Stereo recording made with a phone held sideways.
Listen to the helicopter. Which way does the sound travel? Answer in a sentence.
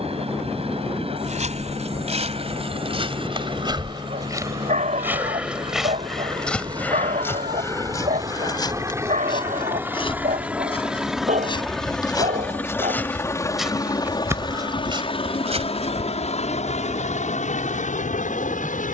In this clip you hear the helicopter travel towards the left.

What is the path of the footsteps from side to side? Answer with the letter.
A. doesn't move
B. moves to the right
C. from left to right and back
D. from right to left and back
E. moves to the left
D.